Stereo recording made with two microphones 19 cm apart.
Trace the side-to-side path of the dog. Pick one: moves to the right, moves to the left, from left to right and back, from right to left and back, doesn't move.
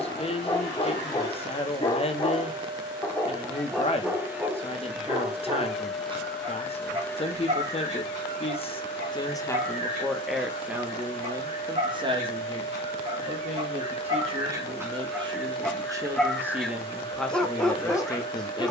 from left to right and back.